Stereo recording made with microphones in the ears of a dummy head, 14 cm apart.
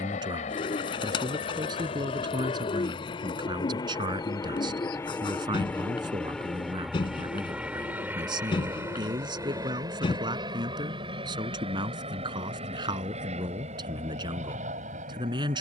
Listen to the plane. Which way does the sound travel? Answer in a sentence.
In this clip you hear the plane travel towards the right.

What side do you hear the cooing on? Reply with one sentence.
In this clip you hear the cooing on the left.